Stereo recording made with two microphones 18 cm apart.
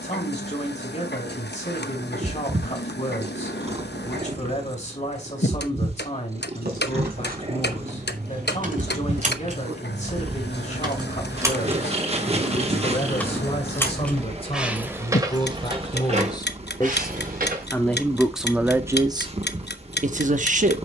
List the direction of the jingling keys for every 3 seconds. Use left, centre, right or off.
off, off, right, right, centre, right, off.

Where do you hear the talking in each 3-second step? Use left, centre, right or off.
left, left, left, left, left, left, right.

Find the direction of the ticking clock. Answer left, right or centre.
left.